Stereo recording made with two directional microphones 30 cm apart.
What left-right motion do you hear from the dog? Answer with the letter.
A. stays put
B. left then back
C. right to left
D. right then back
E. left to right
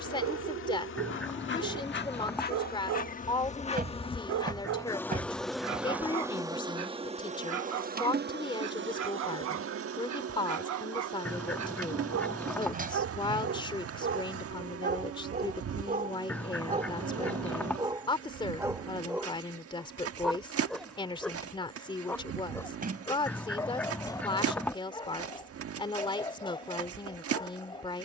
C.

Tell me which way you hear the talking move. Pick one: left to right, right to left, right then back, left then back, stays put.
stays put.